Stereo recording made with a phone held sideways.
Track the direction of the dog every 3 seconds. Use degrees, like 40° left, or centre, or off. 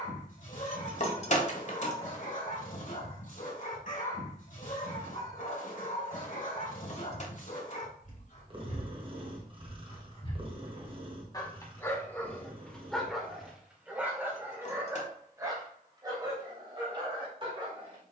60° left, 60° left, 60° left, 30° left, centre, 30° right.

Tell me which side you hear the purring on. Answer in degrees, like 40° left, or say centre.
40° right.